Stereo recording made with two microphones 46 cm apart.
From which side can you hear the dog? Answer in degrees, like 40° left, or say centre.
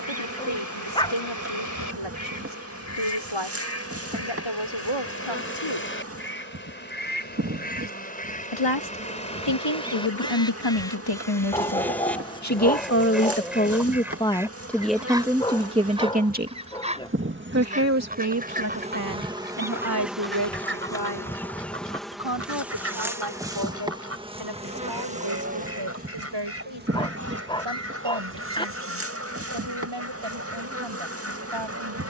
10° left.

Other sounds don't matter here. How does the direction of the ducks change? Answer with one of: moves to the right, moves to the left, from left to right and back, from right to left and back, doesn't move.
moves to the right.